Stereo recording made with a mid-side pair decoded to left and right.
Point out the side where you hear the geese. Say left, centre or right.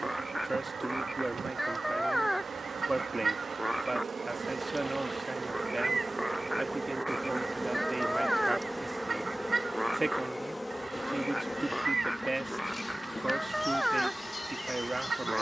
right.